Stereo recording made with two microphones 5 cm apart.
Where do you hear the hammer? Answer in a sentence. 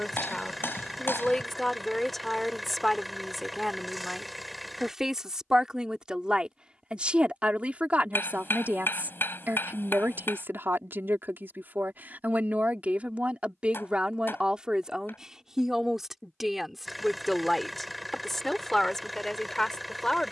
In this clip you hear the hammer on the left.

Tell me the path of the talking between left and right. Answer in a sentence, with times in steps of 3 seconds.
You can hear the talking in the centre from 0 s, on the right from 6 s and in the centre from 15 s.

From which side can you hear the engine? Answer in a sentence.
You can hear the engine in the centre.